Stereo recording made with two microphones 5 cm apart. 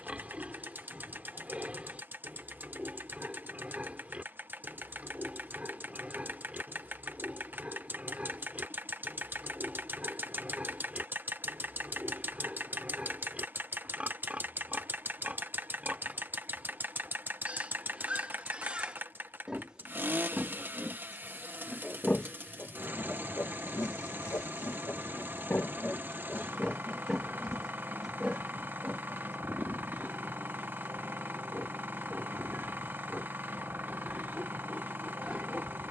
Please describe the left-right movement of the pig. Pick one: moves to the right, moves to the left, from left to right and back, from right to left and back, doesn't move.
from right to left and back.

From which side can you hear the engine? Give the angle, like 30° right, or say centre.
40° right.